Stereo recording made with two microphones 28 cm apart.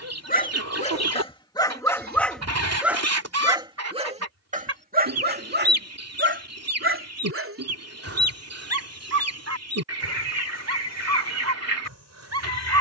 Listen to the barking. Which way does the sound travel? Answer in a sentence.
In this clip you hear the barking go from the left side to the right.